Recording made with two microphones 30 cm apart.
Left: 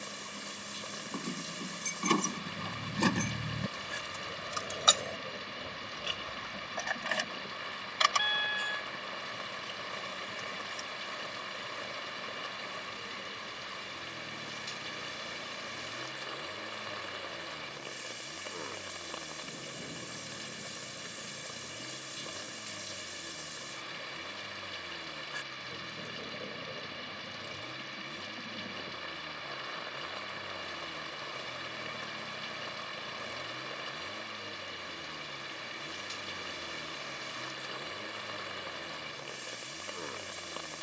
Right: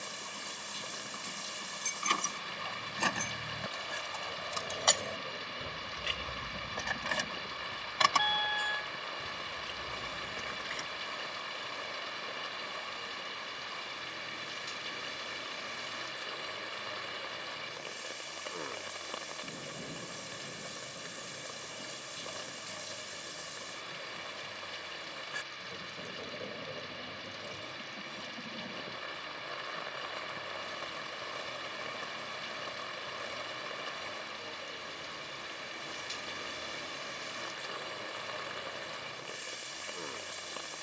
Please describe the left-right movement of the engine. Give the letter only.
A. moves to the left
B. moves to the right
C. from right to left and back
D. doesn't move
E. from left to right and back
D.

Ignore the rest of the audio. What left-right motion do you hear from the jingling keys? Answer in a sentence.
In this clip you hear the jingling keys move from left to right.